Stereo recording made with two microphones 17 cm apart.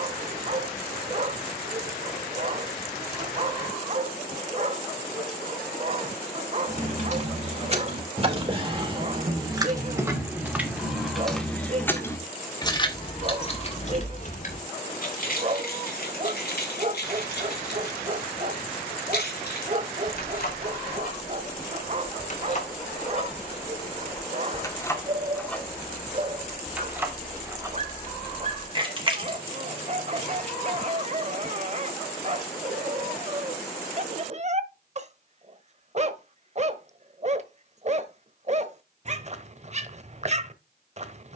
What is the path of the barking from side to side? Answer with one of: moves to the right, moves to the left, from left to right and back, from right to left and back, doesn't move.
doesn't move.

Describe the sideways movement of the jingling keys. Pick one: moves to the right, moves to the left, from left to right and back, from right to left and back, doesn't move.
from right to left and back.